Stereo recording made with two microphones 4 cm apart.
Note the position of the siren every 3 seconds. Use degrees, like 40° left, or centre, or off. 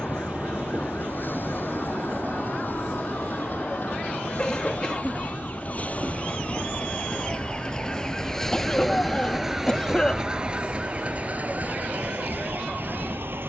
50° left, 40° left, 20° left, 30° right, 60° right.